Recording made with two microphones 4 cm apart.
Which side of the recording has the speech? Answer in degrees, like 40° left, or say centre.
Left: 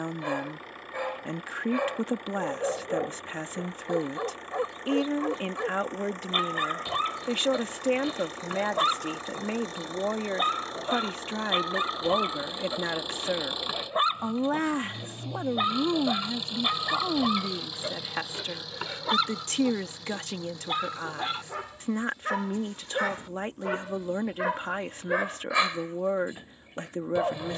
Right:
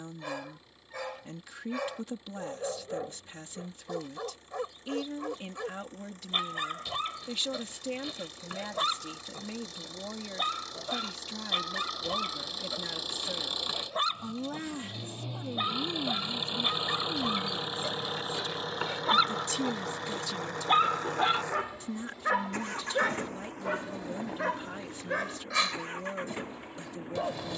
50° left.